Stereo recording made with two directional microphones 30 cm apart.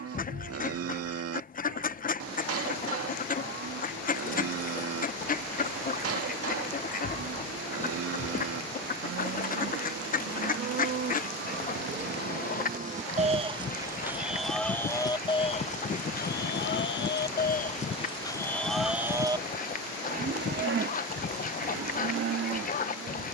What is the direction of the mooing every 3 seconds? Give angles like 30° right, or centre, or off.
60° right, 60° right, 60° right, 50° right, 20° right, 30° left, 10° right, 50° right.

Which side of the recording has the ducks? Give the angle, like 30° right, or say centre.
30° left.